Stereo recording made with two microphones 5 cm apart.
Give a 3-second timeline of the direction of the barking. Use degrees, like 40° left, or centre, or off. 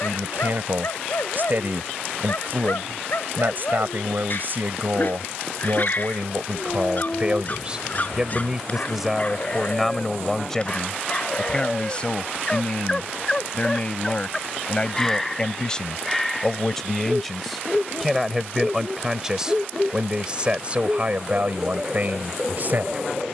60° left, 50° left, 40° left, 30° left, 10° left, centre, 10° right, 10° right.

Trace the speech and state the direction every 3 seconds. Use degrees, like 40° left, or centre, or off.
50° right, 50° right, 20° right, 10° left, 30° left, 10° left, 10° right, 40° right.